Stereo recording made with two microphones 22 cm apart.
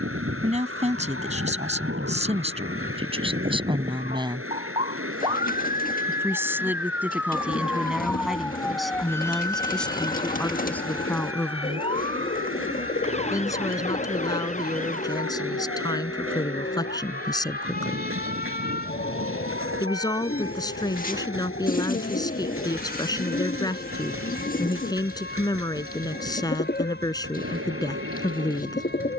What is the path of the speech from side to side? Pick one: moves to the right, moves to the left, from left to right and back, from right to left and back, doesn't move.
moves to the left.